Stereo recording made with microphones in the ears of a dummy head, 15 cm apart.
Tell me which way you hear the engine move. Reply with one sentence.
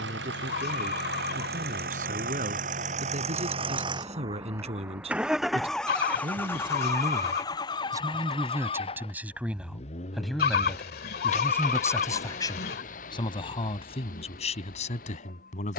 You can hear the engine go from the right side to the left.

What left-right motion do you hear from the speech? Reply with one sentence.
You can hear the speech travel towards the left.